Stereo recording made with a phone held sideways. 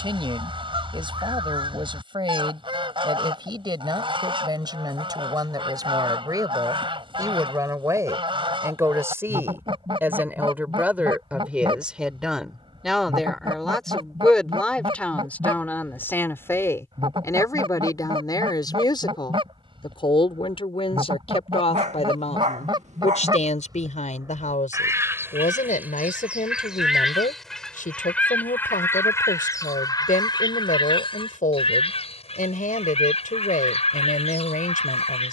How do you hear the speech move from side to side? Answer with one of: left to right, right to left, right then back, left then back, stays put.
right to left.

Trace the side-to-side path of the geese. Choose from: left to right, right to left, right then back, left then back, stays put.
right to left.